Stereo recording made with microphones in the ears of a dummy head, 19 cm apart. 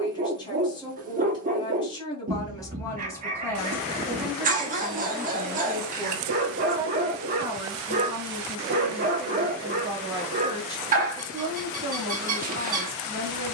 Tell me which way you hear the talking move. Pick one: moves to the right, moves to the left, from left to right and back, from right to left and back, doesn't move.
moves to the right.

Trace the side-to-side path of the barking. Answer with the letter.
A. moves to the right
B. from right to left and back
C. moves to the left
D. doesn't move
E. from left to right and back
D.